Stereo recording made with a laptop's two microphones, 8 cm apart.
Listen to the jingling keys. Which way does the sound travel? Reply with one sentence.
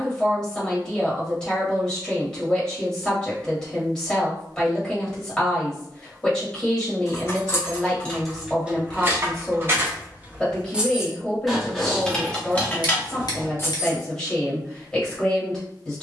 You can hear the jingling keys move from left to right and back again.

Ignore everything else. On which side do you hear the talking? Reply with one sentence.
In this clip you hear the talking in the centre.